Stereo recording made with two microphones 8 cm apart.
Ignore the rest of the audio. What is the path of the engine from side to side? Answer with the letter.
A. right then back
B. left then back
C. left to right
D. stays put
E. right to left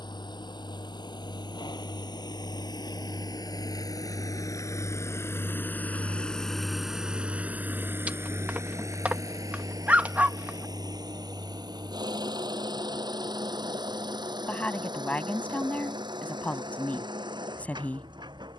C.